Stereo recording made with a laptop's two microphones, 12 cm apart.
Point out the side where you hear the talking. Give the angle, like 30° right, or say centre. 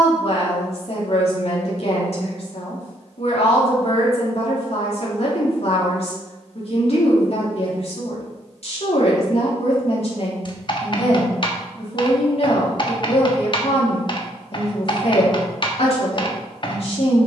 60° left.